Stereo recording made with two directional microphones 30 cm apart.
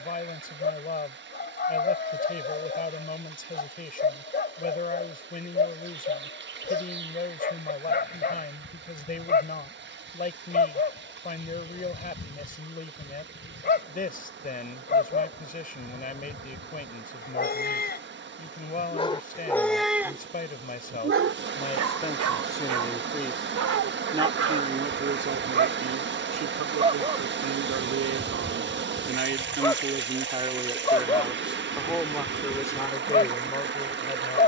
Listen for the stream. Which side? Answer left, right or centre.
right.